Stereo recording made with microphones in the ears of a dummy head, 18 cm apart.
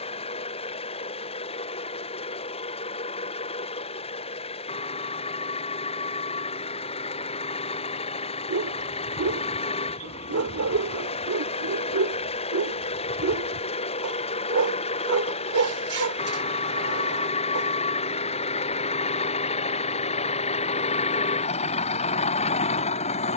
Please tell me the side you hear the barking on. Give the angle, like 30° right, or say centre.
80° right.